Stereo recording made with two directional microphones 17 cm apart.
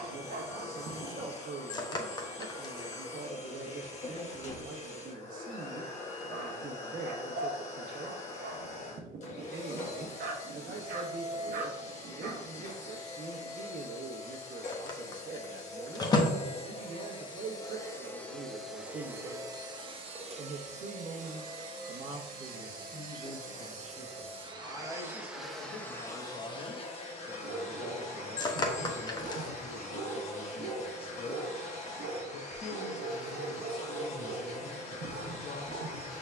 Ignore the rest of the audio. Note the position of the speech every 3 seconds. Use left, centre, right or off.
right, right, right, right, right, right, right, right, left, left, left, left.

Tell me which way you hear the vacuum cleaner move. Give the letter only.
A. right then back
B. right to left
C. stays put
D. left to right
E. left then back
A.